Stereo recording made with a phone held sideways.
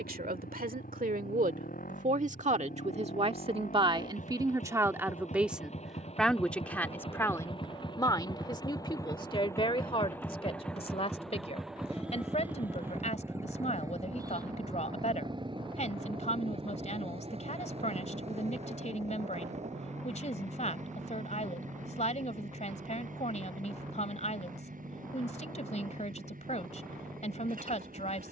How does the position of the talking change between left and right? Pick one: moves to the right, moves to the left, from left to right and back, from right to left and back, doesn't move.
moves to the left.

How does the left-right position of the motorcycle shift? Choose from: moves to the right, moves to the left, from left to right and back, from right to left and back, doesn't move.
moves to the right.